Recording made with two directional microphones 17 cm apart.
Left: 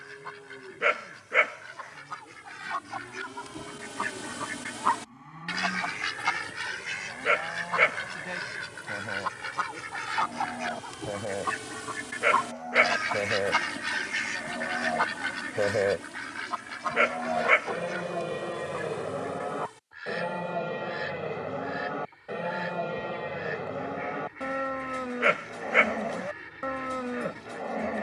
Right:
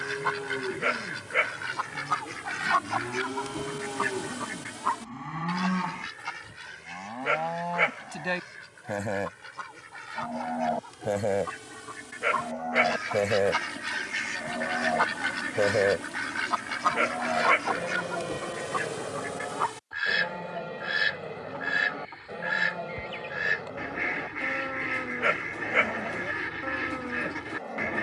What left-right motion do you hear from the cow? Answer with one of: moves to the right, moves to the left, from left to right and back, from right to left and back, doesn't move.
moves to the left.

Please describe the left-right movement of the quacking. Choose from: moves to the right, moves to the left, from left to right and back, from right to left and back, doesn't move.
from right to left and back.